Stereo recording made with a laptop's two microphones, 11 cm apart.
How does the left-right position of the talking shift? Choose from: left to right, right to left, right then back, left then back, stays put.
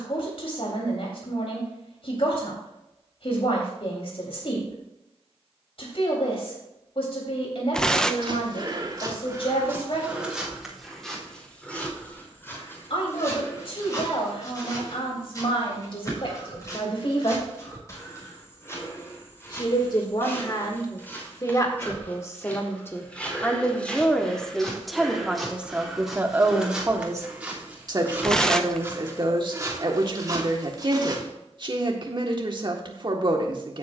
left to right.